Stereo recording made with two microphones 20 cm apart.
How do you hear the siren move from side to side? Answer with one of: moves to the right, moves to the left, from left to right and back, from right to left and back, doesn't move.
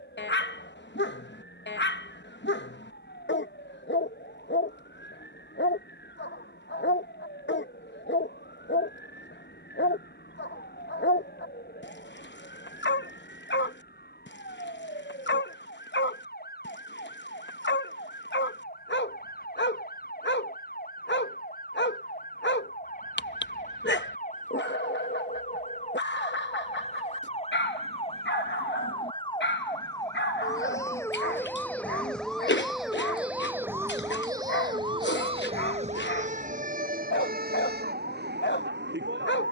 moves to the right.